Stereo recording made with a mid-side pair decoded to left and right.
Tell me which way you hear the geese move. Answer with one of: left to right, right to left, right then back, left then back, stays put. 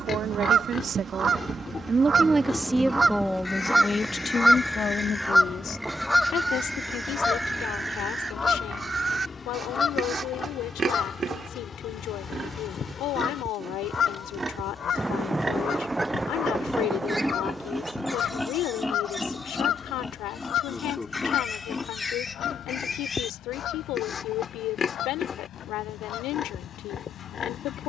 right to left.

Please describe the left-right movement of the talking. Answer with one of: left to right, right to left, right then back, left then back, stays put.
right to left.